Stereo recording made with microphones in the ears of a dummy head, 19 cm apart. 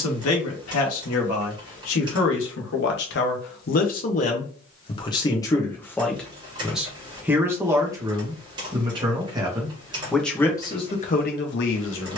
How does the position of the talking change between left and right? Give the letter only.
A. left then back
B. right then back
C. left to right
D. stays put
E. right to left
B.